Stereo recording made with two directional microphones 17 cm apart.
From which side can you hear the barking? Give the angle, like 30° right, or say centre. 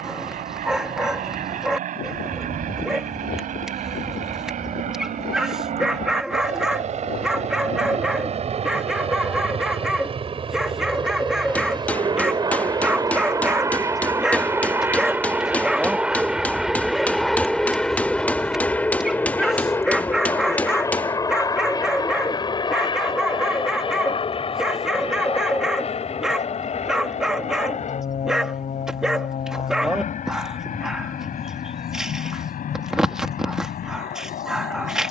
centre.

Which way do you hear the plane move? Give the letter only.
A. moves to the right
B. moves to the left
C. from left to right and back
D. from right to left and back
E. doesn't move
B.